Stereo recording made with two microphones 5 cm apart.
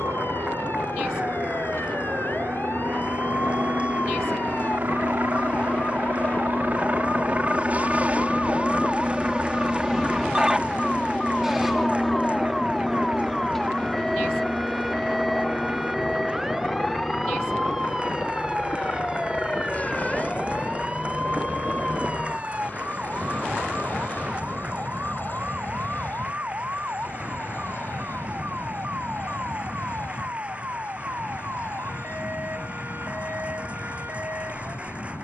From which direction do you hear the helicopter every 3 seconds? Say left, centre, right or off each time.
right, right, right, centre, centre, left, left, left, left, left, left, left.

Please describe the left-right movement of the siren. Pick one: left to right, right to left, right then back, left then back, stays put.
left to right.